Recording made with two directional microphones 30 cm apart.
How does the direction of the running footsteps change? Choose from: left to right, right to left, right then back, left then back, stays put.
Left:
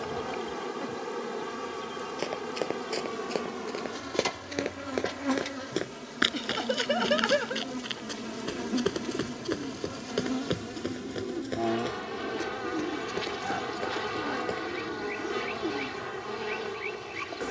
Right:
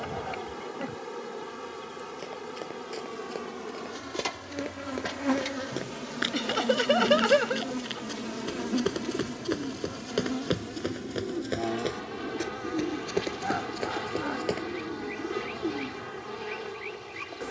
left to right.